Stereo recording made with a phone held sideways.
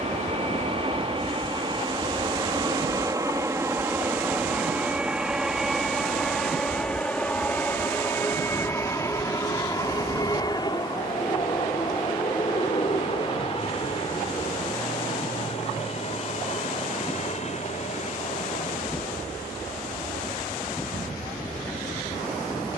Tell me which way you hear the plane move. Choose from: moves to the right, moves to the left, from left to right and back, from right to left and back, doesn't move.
moves to the left.